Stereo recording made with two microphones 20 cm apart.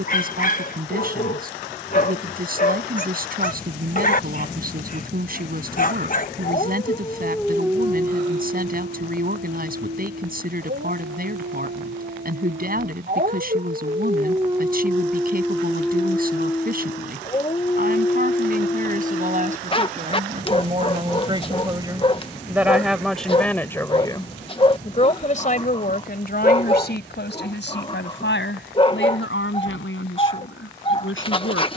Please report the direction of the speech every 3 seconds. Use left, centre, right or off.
right, right, right, right, right, right, right, centre, left, left, left.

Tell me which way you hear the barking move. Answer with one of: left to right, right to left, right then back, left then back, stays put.
right then back.